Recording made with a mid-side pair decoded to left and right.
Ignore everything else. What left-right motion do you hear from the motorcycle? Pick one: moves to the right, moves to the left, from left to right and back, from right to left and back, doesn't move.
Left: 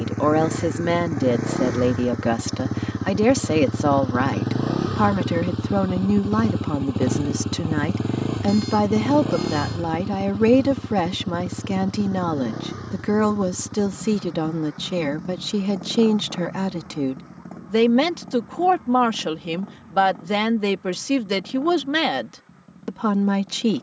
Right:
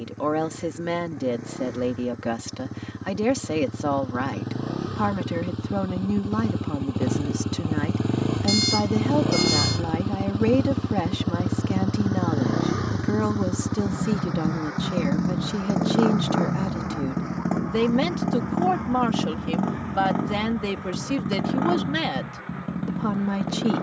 moves to the right.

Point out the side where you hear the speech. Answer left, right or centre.
left.